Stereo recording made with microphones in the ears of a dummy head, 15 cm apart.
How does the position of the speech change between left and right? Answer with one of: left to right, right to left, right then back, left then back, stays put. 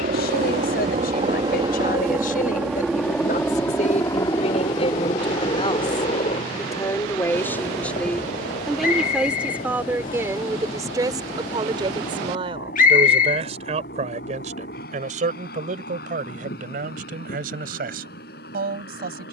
left to right.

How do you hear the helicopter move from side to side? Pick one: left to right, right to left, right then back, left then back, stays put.
right to left.